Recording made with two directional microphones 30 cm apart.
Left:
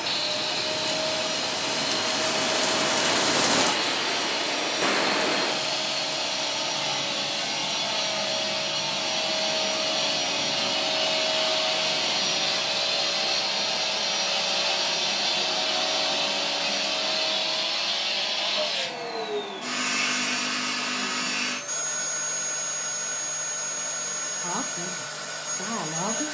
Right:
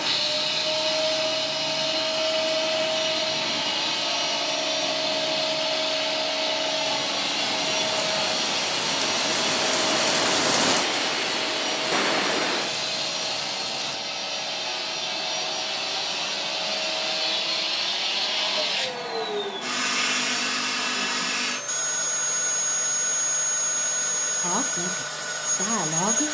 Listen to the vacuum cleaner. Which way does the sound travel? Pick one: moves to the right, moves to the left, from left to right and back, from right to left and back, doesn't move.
from right to left and back.